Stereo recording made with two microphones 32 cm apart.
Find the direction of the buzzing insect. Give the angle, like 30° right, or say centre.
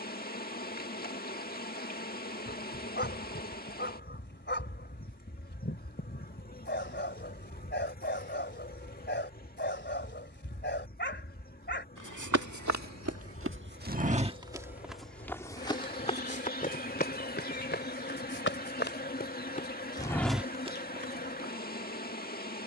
30° left.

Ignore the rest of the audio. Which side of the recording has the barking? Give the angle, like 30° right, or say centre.
30° left.